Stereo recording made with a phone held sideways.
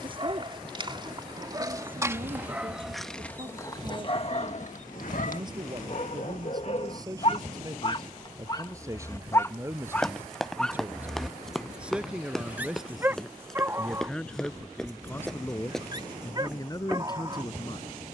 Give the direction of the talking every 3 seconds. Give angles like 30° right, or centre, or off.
30° right, 30° right, 20° right, 10° right, centre, 20° left.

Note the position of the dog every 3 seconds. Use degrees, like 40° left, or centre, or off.
20° right, 40° left, 40° left, 10° left, 20° right, 30° right.